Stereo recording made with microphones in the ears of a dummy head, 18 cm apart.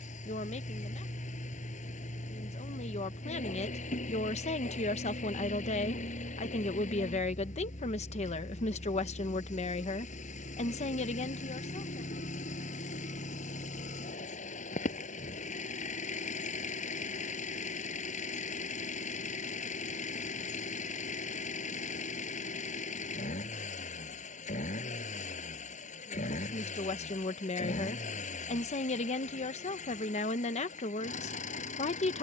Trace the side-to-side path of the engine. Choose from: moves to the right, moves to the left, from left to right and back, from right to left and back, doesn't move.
doesn't move.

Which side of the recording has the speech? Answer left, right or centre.
left.